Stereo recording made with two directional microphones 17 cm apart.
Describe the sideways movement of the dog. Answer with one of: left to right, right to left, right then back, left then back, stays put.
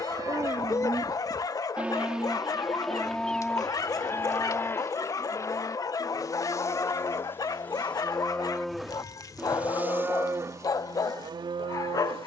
stays put.